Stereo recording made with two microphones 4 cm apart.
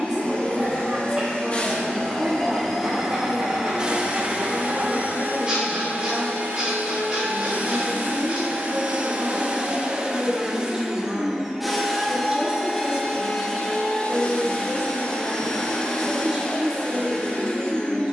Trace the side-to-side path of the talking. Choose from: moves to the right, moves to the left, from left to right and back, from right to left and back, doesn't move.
doesn't move.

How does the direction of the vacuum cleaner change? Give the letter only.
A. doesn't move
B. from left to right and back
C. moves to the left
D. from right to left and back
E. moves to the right
B.